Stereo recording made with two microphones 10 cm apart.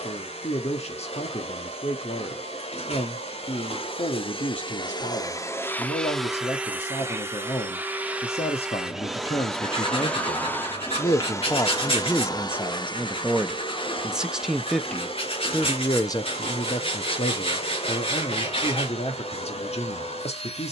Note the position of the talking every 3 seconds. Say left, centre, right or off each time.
left, left, left, left, centre, left, left.